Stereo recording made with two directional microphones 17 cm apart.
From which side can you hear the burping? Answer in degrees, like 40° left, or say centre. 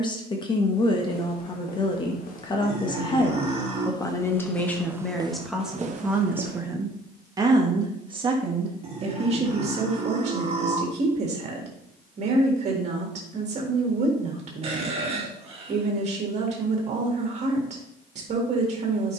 40° right.